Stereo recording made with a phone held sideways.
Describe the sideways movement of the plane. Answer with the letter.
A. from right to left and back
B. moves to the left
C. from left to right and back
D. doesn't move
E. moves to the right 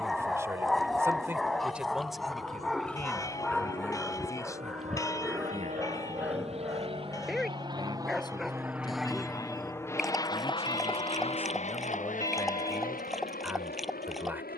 B.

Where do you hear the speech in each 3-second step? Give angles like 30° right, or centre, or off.
10° right, 20° left, 30° left, 20° left, centre.